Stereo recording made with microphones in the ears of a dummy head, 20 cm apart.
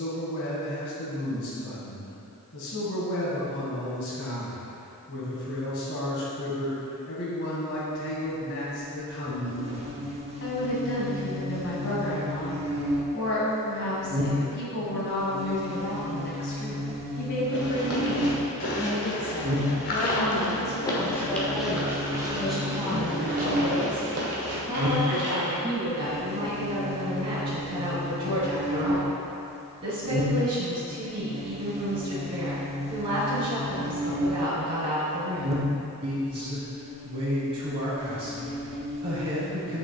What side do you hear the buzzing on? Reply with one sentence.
You can hear the buzzing on the right.